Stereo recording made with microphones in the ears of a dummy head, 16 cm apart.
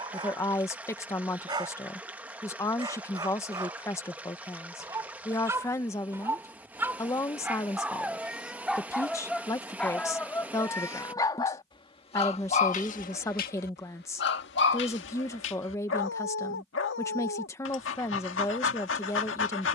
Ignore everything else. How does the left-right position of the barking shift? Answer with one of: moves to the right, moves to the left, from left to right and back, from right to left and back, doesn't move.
moves to the left.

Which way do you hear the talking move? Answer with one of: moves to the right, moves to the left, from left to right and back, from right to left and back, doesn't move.
doesn't move.